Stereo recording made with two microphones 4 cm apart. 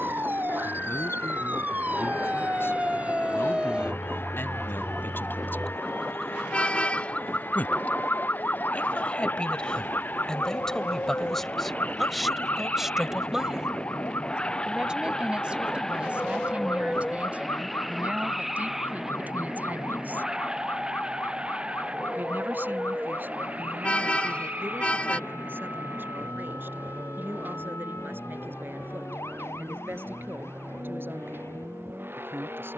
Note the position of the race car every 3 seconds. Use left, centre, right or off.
left, left, left, left, left, centre, centre, right, right, right, right.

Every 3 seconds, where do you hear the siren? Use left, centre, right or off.
right, centre, left, left, left, left, left, left, left, left, left.